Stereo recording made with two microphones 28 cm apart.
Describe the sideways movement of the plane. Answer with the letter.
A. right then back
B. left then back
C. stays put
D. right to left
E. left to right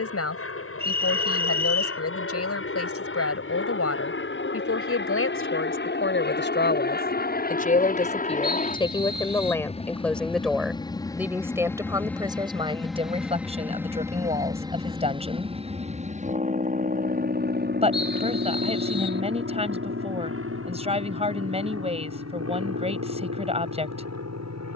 E.